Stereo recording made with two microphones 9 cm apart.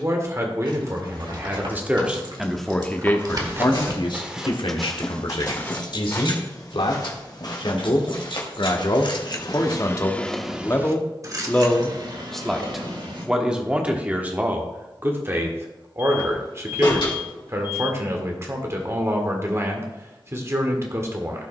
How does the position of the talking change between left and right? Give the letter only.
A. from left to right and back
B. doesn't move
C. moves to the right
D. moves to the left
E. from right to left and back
E.